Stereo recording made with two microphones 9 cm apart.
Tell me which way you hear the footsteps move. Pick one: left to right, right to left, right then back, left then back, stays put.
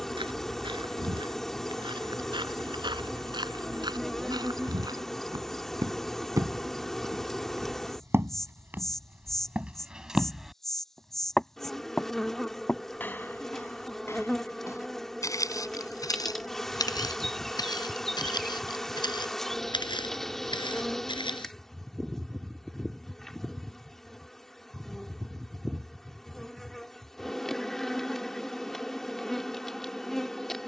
right to left.